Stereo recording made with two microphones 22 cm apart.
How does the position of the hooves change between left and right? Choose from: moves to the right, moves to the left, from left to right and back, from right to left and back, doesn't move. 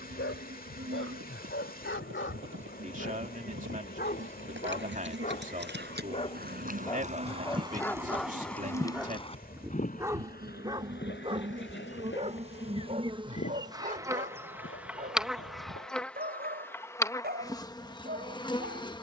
moves to the left.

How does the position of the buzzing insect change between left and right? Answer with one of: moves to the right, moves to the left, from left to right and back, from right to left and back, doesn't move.
moves to the left.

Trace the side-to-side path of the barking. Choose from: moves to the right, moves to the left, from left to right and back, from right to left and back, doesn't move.
moves to the right.